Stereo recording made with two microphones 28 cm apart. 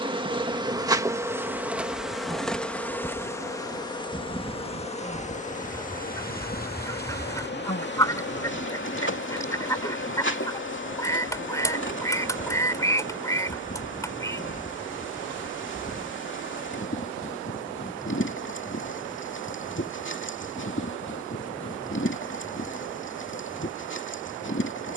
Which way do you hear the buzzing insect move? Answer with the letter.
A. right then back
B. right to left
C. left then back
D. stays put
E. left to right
B.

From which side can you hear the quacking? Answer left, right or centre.
centre.